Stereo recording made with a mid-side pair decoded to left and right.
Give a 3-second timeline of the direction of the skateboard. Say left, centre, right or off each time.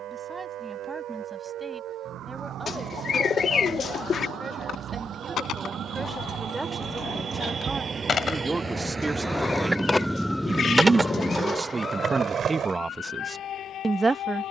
off, left, left, centre, right.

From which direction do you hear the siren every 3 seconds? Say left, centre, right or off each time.
right, right, right, centre, left.